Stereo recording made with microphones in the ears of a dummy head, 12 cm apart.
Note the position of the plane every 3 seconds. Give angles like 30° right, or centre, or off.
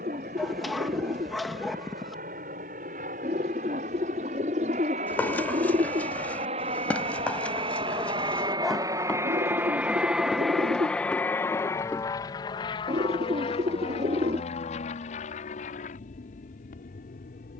70° right, 70° right, 40° right, centre, 40° left, 60° left.